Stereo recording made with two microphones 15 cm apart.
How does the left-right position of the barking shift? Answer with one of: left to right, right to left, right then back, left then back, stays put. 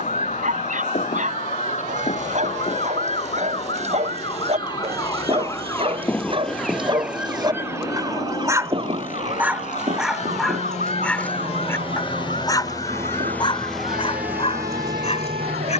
right to left.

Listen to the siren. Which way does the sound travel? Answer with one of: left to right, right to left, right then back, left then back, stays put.
left to right.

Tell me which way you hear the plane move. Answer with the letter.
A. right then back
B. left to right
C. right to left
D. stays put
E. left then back
B.